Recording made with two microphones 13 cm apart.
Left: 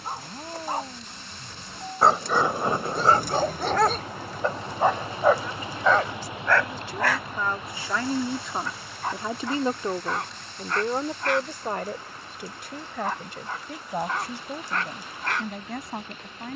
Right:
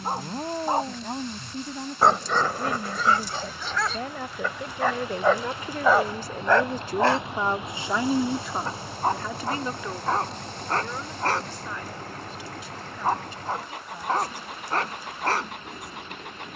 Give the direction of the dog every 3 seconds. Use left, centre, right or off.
centre, left, right, right, right, right.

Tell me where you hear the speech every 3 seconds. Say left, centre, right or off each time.
right, right, right, left, left, left.